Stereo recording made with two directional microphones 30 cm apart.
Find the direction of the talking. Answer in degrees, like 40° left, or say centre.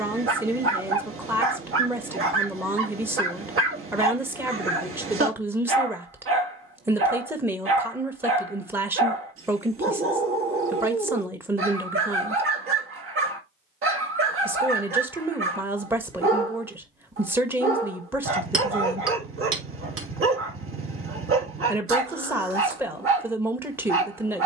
10° right.